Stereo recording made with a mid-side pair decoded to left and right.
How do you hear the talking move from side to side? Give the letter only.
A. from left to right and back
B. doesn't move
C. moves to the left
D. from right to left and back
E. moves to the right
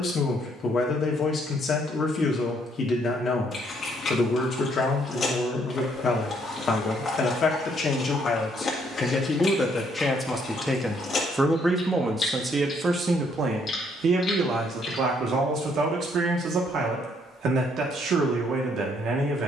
E.